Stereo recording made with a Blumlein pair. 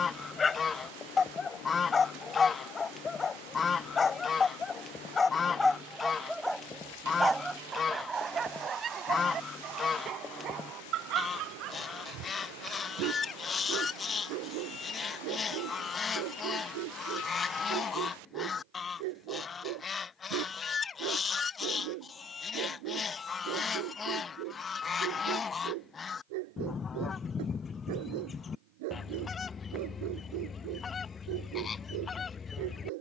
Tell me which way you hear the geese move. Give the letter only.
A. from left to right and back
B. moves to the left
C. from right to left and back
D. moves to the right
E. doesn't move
E.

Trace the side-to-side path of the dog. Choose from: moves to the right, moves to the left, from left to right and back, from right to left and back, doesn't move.
moves to the right.